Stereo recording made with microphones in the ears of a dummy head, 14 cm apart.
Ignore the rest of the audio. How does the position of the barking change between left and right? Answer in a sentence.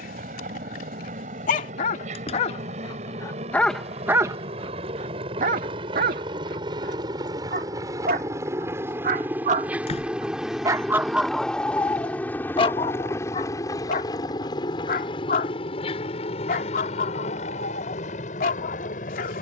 In this clip you hear the barking go right and come back.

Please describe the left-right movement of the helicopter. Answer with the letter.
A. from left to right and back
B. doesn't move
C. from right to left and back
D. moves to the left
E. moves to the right
D.